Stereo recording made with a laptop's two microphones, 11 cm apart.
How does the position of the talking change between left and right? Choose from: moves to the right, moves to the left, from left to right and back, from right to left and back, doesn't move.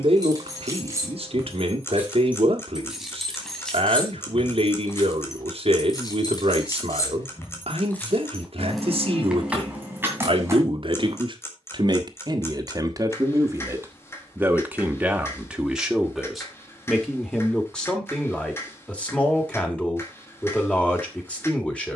moves to the left.